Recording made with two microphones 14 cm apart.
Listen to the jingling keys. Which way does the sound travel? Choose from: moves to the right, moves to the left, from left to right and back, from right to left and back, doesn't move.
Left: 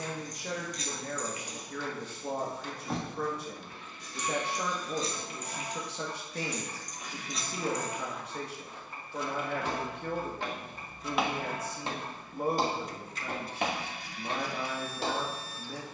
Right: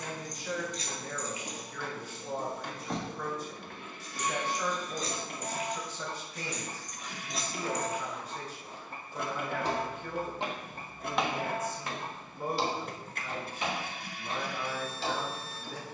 from right to left and back.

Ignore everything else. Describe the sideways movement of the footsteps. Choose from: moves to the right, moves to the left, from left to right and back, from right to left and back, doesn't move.
from left to right and back.